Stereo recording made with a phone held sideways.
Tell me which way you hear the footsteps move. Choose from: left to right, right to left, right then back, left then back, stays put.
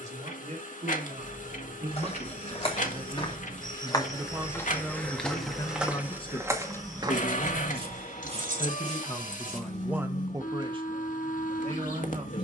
left to right.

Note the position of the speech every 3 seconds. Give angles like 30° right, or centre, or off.
50° right, centre, 50° left, 20° right.